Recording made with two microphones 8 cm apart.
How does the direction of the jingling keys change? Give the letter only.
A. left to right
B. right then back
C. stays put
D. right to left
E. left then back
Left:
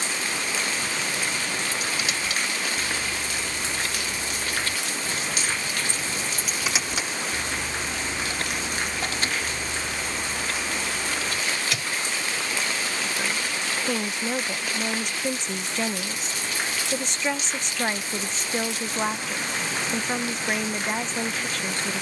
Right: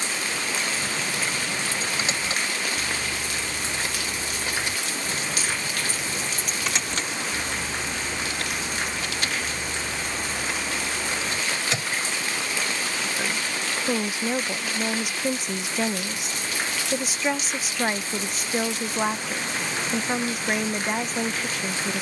E.